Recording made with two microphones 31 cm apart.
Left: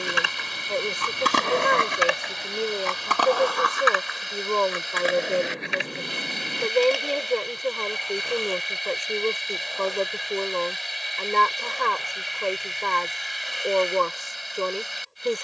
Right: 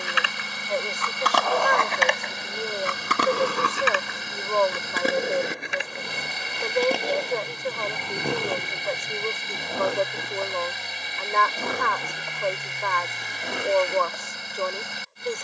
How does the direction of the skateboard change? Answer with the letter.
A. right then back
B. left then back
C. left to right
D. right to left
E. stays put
C.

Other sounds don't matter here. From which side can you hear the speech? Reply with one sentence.
In this clip you hear the speech on the left.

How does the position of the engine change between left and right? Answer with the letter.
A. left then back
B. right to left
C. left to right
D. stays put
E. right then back
D.